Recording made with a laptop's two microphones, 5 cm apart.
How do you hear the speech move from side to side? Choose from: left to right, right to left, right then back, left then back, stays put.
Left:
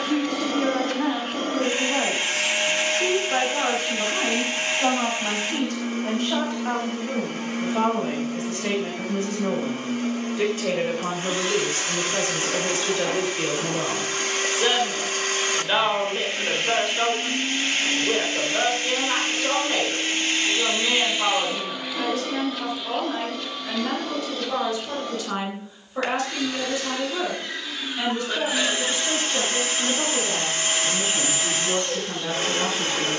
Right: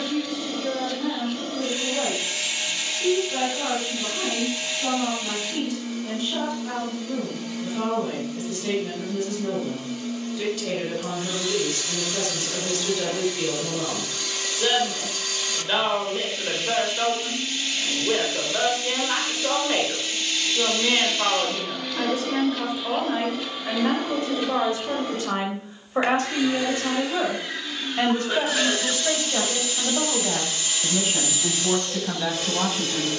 left to right.